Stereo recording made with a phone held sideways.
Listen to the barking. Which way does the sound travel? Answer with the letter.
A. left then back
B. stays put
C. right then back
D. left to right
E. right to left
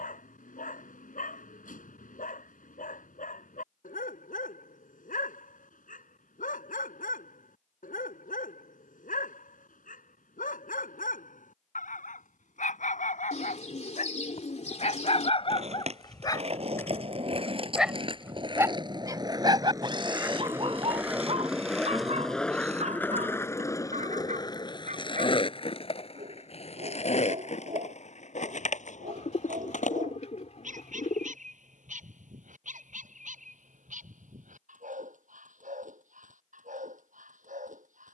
D.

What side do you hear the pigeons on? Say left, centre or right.
left.